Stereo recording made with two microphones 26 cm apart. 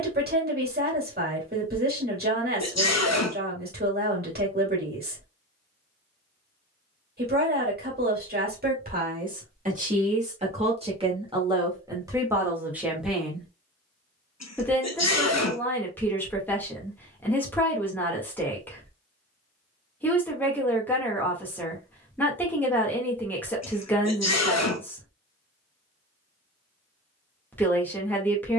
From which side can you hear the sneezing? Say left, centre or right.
left.